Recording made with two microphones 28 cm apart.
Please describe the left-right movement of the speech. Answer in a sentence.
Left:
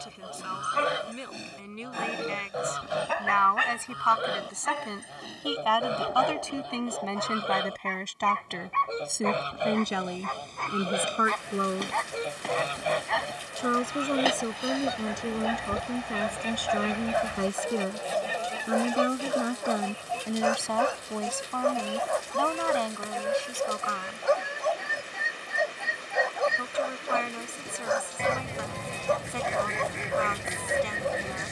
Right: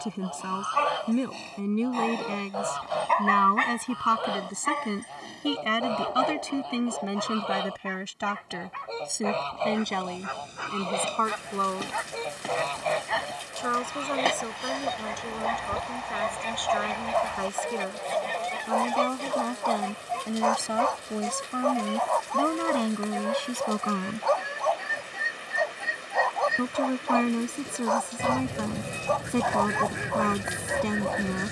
In this clip you hear the speech move from right to left and back again.